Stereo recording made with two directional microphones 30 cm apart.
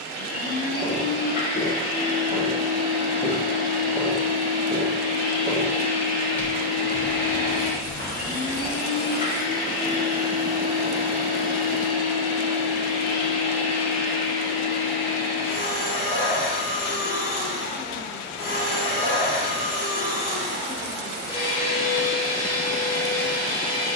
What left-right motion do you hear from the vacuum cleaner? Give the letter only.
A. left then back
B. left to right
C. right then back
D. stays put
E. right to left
D.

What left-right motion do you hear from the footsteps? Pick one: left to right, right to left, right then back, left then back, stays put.
right then back.